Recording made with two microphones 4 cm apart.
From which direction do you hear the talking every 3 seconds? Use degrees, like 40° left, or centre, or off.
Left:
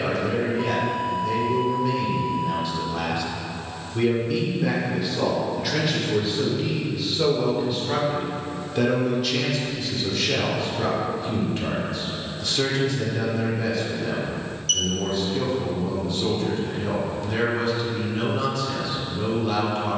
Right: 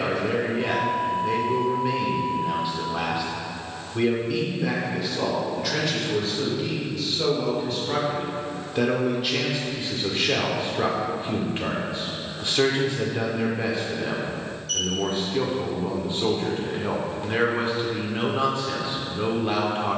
30° right, centre, 10° left, 30° right, 30° right, 30° right, 30° right.